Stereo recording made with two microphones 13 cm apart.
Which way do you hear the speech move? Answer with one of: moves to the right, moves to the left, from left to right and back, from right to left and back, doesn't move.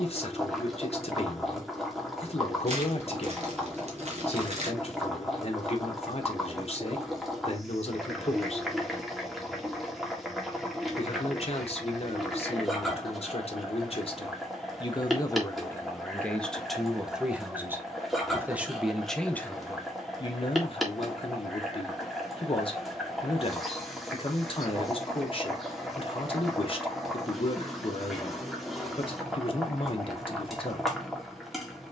from left to right and back.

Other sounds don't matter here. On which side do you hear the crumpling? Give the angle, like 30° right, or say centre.
60° right.